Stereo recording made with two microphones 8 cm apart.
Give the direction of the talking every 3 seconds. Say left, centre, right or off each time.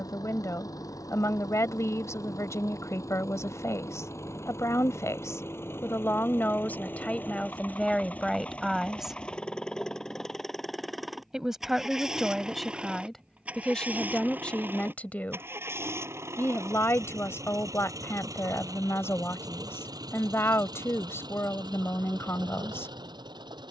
left, left, centre, centre, centre, left, left, left.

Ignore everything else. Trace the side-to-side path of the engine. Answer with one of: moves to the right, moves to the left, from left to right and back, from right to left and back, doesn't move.
moves to the right.